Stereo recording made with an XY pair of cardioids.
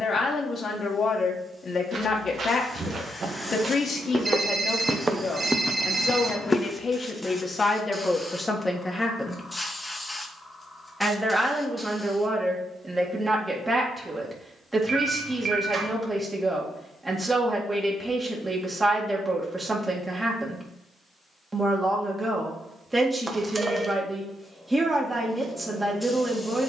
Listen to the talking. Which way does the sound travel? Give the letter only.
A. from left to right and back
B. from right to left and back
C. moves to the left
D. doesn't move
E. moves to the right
E.